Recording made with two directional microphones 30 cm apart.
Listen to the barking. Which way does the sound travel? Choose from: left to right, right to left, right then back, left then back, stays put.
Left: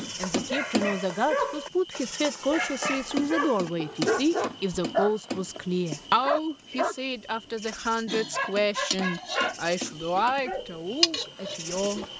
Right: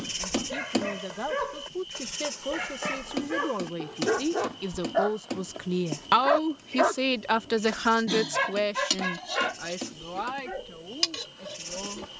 right then back.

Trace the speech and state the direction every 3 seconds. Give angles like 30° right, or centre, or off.
50° left, 30° left, 10° right, 60° left.